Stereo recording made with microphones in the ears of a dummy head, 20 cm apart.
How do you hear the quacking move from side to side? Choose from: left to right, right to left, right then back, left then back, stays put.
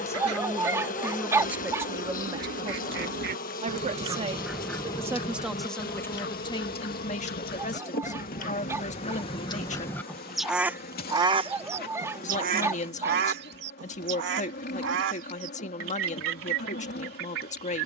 left then back.